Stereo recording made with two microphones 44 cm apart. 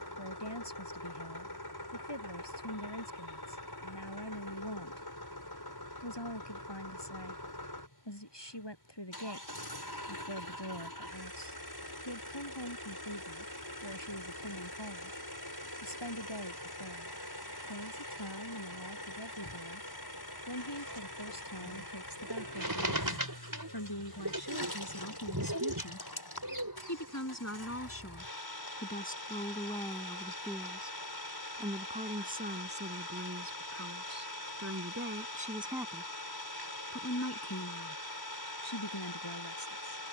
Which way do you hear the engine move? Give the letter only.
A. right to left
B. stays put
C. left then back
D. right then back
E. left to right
B.